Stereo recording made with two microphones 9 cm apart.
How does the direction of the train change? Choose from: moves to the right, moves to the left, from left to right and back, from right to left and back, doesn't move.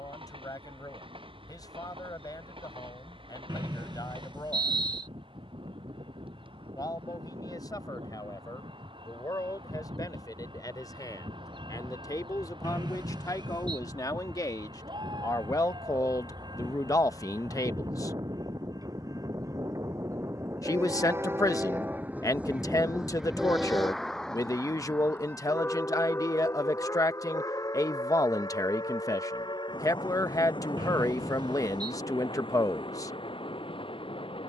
moves to the left.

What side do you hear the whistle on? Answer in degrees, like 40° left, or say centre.
50° right.